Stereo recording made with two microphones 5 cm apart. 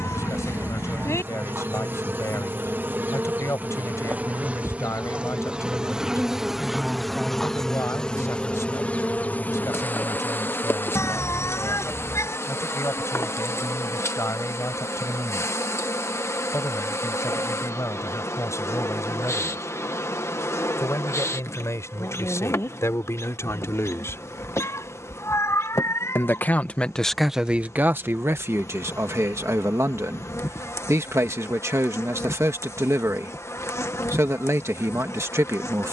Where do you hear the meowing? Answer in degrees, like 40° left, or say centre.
70° left.